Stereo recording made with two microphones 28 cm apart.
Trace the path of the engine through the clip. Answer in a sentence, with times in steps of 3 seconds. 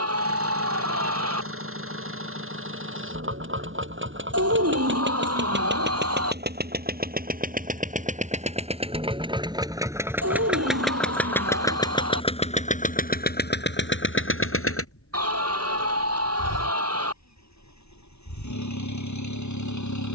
You can hear the engine on the right from 0 s, in the centre from 9 s and on the left from 12 s.